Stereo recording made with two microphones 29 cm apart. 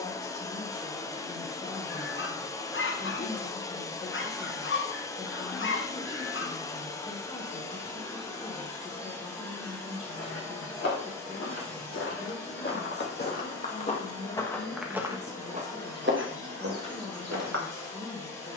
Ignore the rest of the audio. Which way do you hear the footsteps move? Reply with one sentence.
In this clip you hear the footsteps move from left to right.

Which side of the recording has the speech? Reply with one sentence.
In this clip you hear the speech on the left.